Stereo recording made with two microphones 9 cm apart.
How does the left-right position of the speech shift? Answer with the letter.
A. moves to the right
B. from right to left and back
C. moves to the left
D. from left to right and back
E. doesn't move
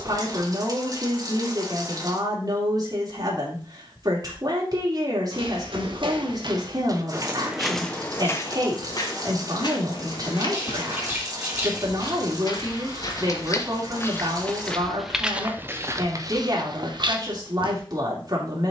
E.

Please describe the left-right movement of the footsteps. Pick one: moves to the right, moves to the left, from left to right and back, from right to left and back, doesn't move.
from right to left and back.